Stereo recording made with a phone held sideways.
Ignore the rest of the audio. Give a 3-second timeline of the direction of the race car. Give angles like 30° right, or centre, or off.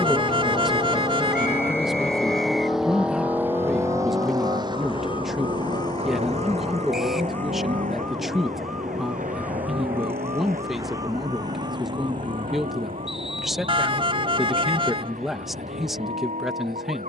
20° left, 30° right, 50° right, 60° right, 70° right, 70° right.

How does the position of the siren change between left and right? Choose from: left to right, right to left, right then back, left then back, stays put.
left to right.